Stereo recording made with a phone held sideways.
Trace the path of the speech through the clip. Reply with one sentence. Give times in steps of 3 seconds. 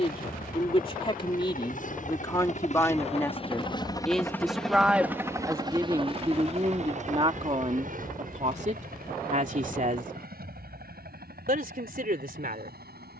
You can hear the speech on the left from 0 s, in the centre from 3 s and on the right from 6 s.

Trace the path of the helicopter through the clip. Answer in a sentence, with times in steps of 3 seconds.
You can hear the helicopter on the left from 0 s, in the centre from 3 s and on the right from 6 s.